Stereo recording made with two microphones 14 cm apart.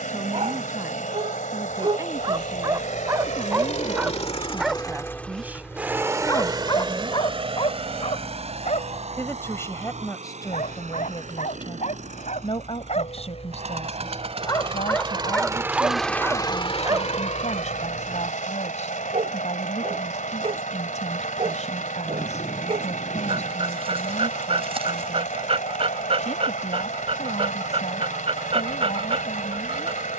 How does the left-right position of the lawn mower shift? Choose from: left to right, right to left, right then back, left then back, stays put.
right then back.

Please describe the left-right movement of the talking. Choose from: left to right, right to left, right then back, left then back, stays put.
right to left.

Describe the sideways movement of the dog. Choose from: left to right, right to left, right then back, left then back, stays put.
left then back.